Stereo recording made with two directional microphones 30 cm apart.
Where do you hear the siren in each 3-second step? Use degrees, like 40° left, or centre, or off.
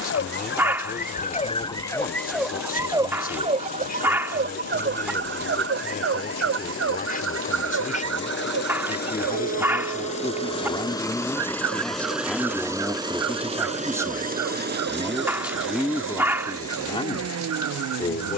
20° left, 30° right, 50° right, 60° right, 60° right, 60° right.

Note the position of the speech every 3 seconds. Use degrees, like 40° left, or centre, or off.
30° left, 30° left, 30° left, 10° left, centre, 10° left.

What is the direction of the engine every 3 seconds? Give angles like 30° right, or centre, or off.
60° left, 60° left, 40° left, 20° left, 20° right, 50° right.